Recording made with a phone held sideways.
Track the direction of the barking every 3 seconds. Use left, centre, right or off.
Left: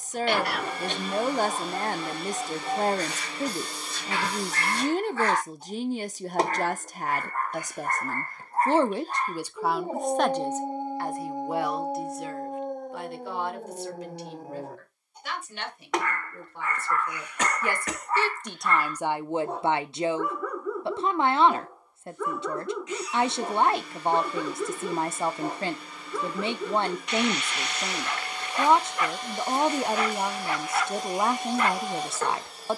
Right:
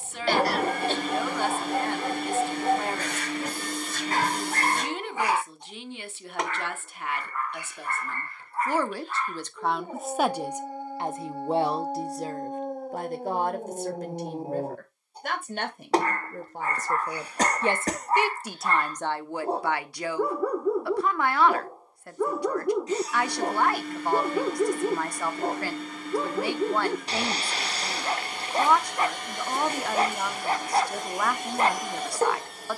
right, right, left, left, centre, right, right, right, right, right, right.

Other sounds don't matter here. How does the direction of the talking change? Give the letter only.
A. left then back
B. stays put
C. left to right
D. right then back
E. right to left
D.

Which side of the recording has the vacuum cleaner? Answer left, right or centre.
right.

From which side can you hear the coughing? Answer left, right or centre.
right.